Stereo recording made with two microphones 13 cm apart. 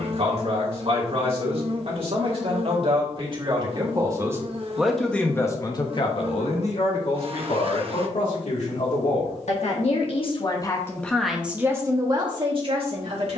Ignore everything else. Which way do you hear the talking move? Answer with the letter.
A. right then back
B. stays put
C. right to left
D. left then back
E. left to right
D.